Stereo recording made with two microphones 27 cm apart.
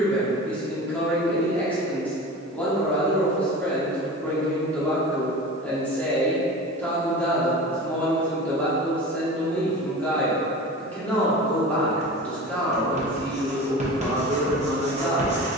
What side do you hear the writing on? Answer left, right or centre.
right.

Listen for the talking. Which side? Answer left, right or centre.
centre.